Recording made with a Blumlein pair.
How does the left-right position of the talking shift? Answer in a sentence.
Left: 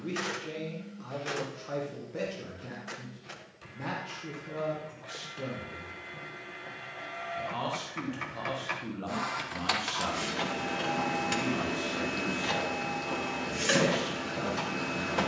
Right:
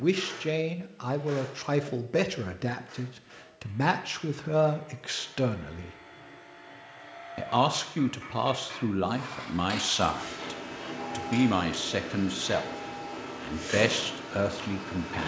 In this clip you hear the talking stay put.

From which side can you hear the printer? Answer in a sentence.
You can hear the printer on the left.